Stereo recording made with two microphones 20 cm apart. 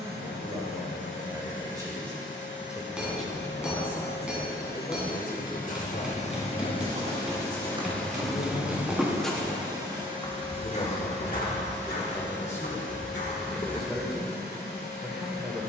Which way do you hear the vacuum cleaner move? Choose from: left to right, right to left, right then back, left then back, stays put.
left to right.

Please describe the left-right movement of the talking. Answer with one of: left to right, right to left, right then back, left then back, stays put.
left then back.